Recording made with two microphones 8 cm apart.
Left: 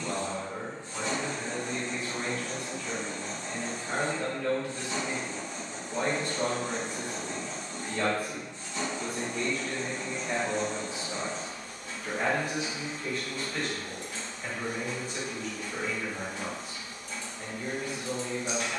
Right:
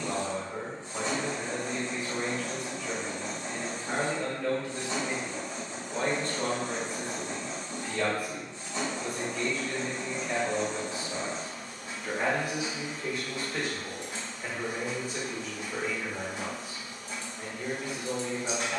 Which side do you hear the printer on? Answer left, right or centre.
right.